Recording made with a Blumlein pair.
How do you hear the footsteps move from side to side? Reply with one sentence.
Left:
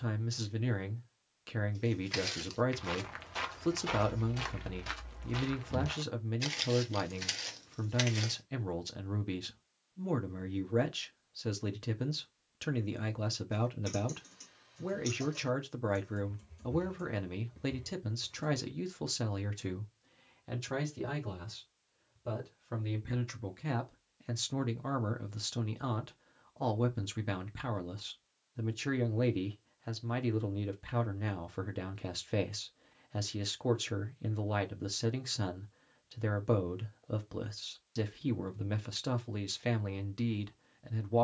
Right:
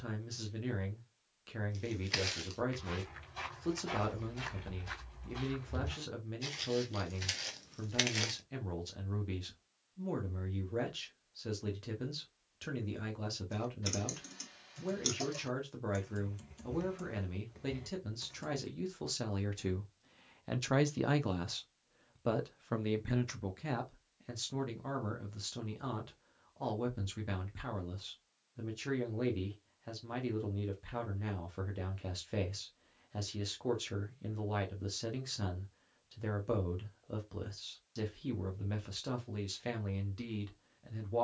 You can hear the footsteps go left and come back.